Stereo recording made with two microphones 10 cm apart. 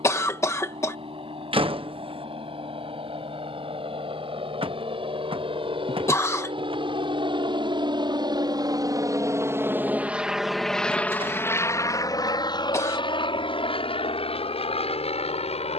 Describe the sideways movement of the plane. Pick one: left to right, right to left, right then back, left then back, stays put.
right to left.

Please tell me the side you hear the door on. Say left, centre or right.
right.